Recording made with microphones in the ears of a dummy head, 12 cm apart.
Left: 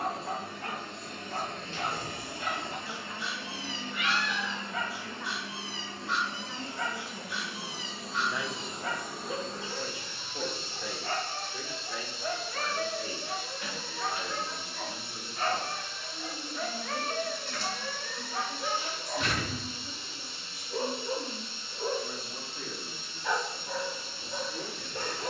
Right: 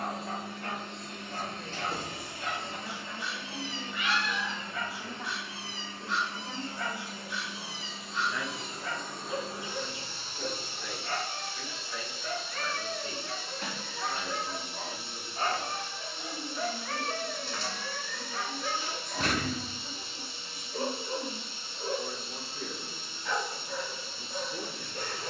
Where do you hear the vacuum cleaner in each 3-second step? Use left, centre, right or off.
left, left, left, right, right, right, right, right, right.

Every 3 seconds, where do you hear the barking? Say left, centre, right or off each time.
left, left, left, left, centre, centre, left, left, left.